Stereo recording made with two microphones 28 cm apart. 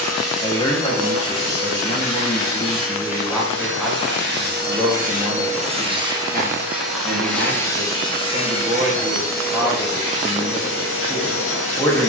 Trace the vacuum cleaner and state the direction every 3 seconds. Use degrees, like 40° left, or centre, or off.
60° right, 40° right, 10° left, 40° left.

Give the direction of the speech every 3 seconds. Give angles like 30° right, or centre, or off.
20° left, 10° right, 30° right, centre.